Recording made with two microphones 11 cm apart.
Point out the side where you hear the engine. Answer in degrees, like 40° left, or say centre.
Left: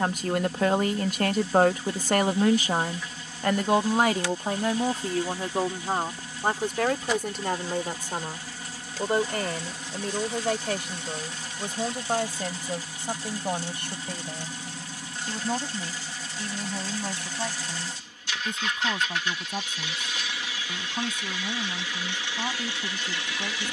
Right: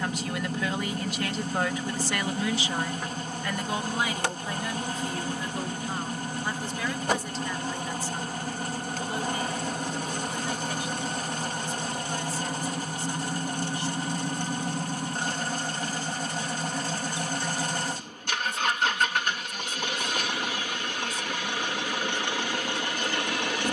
60° right.